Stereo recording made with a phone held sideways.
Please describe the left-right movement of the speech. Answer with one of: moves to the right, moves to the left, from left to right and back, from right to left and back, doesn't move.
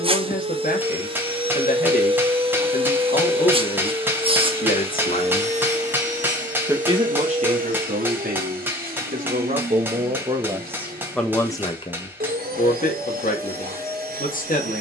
from left to right and back.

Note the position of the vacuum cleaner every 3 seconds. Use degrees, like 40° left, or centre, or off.
30° right, 40° right, 60° right, 70° right, 70° right.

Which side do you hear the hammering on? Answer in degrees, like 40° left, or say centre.
10° right.